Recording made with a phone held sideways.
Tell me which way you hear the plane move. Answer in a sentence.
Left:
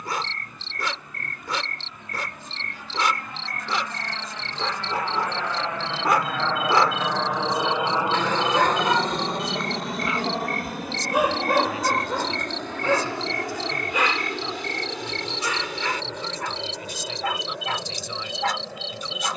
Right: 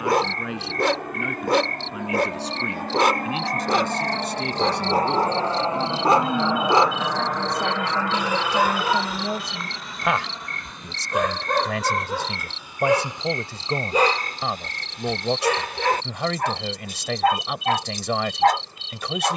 You can hear the plane move from right to left.